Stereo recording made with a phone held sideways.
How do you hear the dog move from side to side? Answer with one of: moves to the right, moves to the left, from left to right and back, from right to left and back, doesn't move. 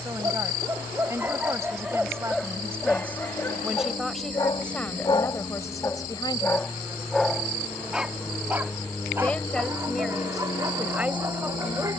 from right to left and back.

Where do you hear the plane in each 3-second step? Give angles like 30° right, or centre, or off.
50° right, 30° right, 10° right, 30° left.